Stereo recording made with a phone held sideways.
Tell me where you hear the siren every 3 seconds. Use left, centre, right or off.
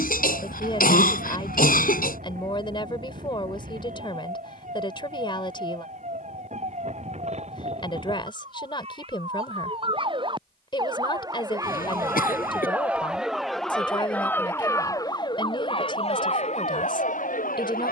right, right, right, right, centre, left.